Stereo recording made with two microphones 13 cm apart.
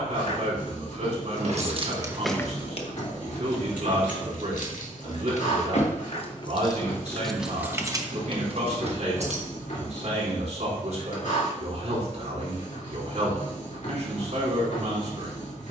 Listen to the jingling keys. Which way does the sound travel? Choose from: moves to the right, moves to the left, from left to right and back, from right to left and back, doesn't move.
from right to left and back.